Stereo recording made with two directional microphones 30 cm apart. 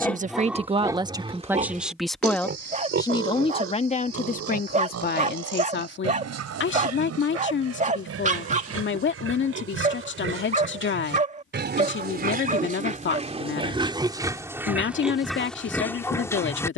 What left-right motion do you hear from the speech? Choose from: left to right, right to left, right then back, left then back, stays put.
right to left.